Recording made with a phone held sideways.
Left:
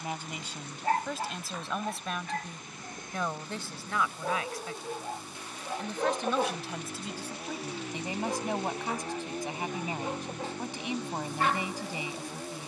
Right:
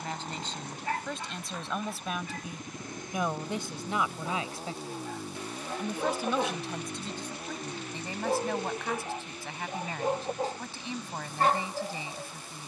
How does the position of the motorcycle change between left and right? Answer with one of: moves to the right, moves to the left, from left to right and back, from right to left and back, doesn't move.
moves to the left.